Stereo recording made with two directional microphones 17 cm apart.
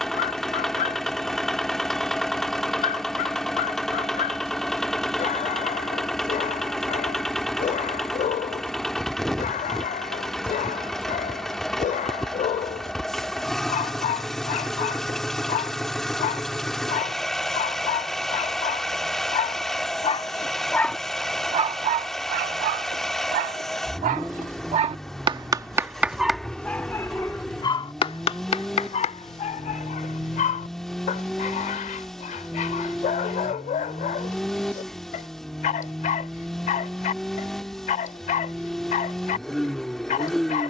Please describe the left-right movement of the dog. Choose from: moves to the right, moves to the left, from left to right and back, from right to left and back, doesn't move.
from left to right and back.